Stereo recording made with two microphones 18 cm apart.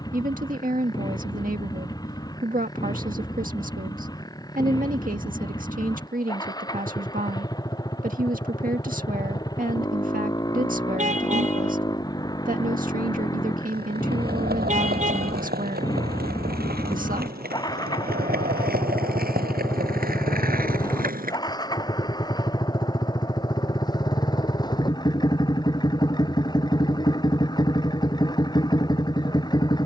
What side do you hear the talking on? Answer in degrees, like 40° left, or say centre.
50° right.